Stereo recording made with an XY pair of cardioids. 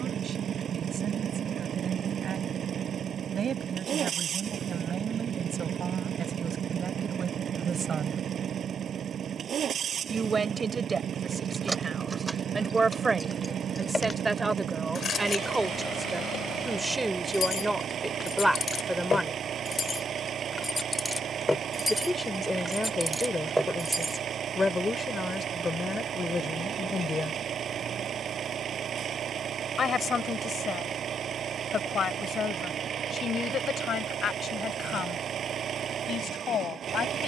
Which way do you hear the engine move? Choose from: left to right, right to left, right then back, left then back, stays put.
stays put.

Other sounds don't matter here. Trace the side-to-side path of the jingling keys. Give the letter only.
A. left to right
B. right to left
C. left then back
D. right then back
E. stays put
C.